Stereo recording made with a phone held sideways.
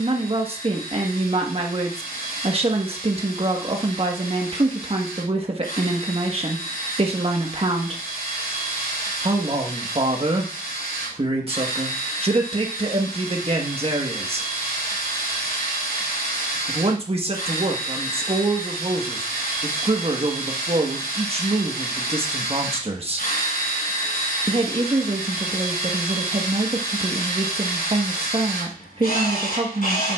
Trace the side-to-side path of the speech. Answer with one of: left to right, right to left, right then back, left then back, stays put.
stays put.